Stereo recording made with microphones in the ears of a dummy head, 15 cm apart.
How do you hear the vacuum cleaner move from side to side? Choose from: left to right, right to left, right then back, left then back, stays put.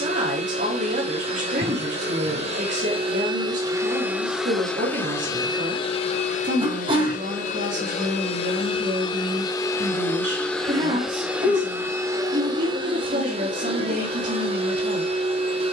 left then back.